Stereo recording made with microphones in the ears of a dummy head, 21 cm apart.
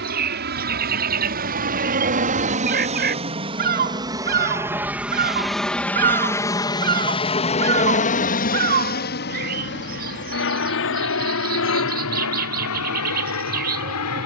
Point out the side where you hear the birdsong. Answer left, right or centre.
right.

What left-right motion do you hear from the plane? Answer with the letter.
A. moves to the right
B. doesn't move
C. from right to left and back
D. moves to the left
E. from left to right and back
D.